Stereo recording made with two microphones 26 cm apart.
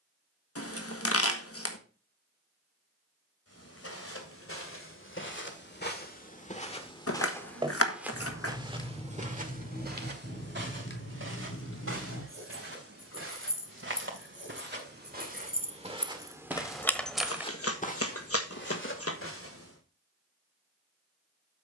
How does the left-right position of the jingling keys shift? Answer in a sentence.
You can hear the jingling keys move from right to left and back again.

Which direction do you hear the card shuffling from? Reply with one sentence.
In this clip you hear the card shuffling on the left.